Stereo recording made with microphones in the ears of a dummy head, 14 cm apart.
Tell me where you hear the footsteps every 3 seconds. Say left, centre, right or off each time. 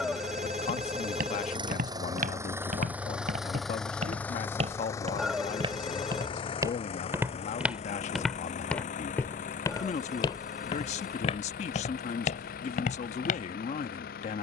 right, right, centre, left, left.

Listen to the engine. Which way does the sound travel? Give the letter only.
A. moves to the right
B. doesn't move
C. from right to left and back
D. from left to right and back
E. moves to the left
E.